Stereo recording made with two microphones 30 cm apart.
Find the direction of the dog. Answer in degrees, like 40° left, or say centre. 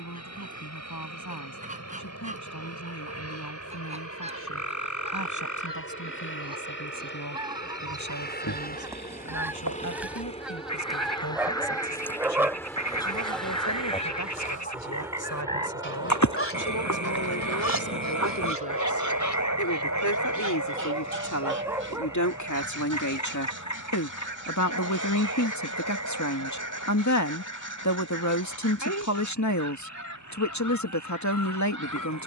10° right.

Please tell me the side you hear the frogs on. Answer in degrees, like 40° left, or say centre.
70° left.